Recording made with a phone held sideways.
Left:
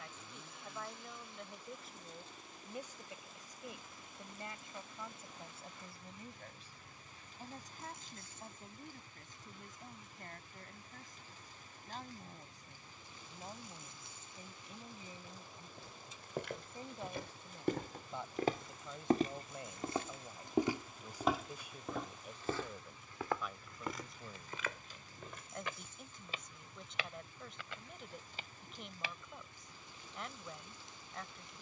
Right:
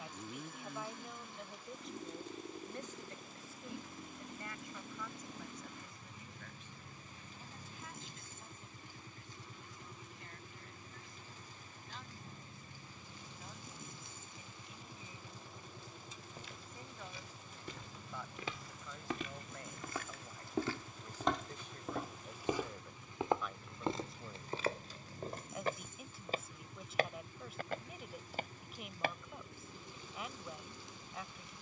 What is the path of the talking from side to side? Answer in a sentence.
You can hear the talking move from right to left and back again.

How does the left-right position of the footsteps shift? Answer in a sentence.
You can hear the footsteps go from the left side to the right.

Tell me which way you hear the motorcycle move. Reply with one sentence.
You can hear the motorcycle stay in one place.